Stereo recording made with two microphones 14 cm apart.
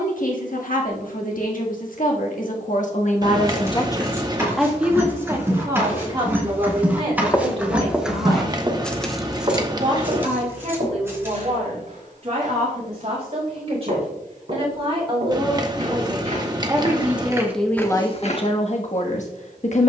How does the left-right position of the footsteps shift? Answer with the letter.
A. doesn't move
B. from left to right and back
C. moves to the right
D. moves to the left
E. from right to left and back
B.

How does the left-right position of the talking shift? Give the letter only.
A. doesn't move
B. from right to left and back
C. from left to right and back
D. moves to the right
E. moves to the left
C.